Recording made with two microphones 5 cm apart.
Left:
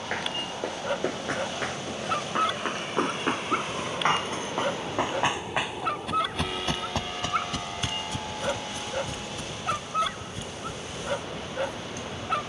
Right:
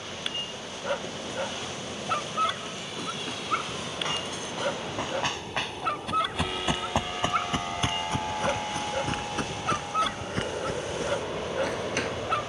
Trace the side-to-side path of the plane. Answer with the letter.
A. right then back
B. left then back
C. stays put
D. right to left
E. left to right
E.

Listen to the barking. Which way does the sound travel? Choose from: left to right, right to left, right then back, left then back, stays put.
stays put.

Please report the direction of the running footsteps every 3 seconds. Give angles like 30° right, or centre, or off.
60° left, 30° left, 30° right, 60° right.